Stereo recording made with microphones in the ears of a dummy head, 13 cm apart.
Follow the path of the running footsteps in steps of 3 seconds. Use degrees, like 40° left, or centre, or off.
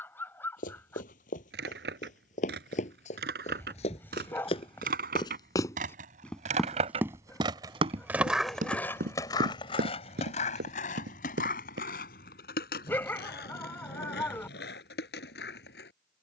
50° left, 40° left, 30° right, 70° right, off, off.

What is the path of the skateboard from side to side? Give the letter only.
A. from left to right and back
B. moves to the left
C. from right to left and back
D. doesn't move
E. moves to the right
B.